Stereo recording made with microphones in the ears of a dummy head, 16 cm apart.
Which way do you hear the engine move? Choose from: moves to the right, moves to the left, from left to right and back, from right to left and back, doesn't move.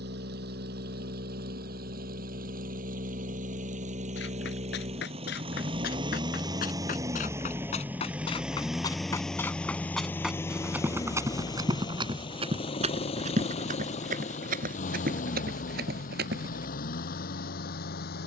moves to the left.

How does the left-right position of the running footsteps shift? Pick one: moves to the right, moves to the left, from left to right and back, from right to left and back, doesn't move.
moves to the right.